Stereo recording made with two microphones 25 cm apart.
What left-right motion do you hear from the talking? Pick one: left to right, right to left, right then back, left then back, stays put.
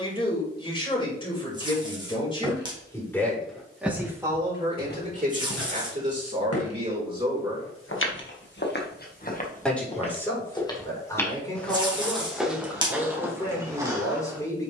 right then back.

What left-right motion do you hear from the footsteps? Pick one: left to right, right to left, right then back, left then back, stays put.
left then back.